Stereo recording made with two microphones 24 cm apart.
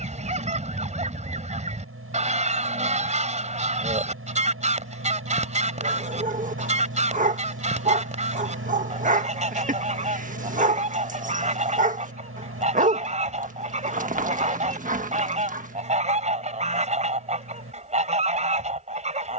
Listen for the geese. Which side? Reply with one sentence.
In this clip you hear the geese on the right.